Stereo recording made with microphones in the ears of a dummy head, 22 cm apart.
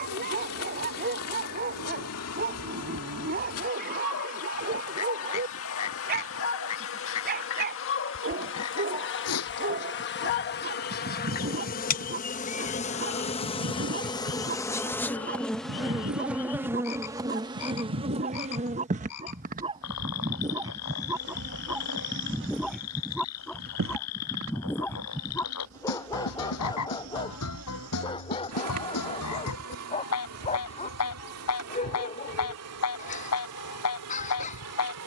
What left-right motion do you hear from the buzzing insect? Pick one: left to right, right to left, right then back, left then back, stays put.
left to right.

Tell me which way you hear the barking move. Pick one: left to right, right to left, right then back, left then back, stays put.
right to left.